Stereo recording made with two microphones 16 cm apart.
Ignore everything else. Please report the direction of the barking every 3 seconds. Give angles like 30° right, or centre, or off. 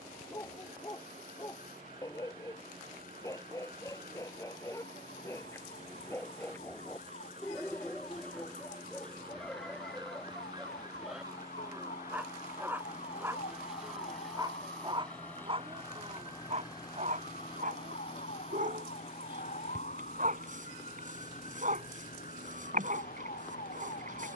20° left, 20° left, 10° left, centre, 20° right, 40° right, 60° right, 60° right.